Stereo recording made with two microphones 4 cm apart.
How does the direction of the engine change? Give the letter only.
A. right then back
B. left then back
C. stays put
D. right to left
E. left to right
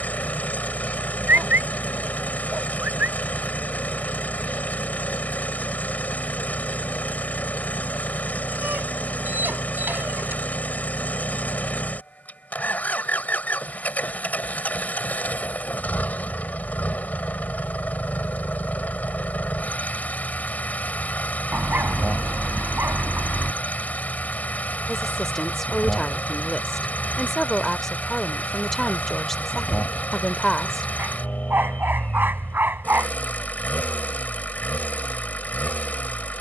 C.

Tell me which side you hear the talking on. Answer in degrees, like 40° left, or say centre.
10° left.